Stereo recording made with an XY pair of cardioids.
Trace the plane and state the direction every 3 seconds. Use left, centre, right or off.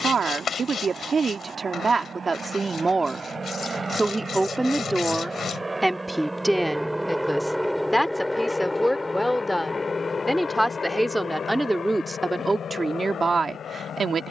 right, right, centre, left, left.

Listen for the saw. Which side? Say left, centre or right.
left.